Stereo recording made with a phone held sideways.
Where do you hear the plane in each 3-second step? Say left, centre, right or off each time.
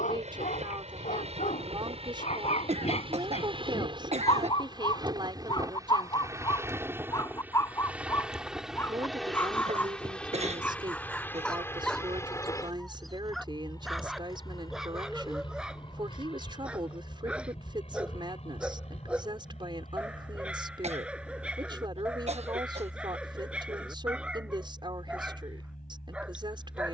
right, right, centre, centre, left, left, left, left, left.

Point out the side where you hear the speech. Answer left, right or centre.
right.